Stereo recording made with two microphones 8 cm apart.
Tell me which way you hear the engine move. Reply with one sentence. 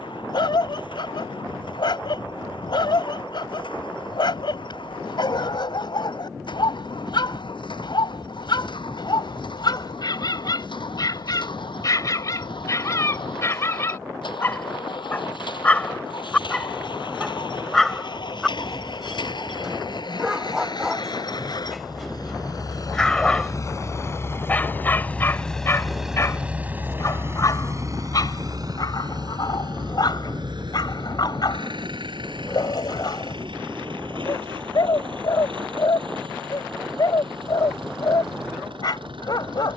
In this clip you hear the engine move from left to right.